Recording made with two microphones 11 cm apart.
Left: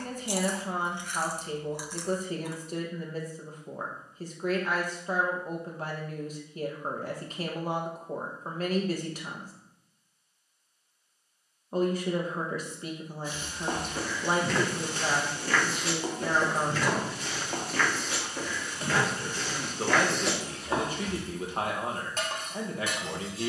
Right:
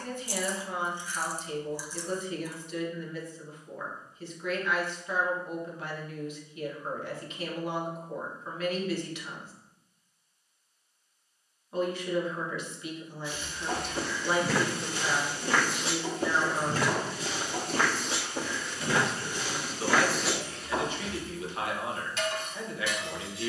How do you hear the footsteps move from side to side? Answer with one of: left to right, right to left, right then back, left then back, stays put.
right then back.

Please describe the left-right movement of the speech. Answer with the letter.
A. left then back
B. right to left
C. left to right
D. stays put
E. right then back
D.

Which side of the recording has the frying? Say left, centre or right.
left.